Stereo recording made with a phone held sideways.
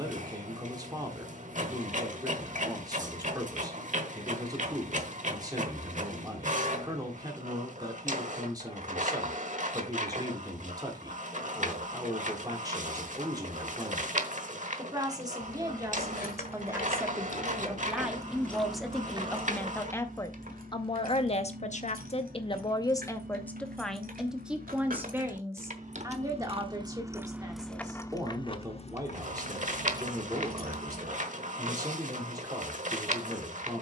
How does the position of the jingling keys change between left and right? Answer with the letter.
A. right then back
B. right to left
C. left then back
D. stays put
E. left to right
A.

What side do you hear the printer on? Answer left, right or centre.
right.